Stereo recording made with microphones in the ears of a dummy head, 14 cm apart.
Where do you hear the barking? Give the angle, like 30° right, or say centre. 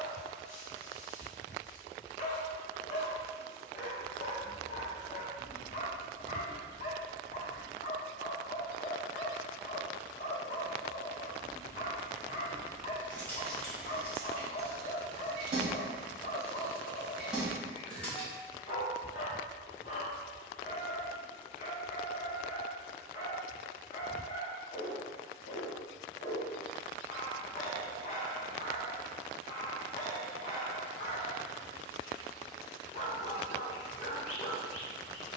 50° left.